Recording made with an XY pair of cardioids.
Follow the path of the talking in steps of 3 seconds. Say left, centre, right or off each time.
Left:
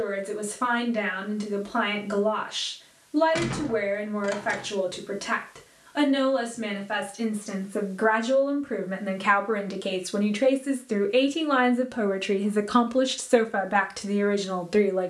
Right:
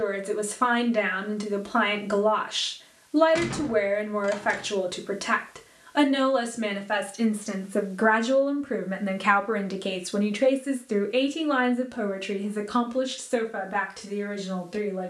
right, right, right, centre, left.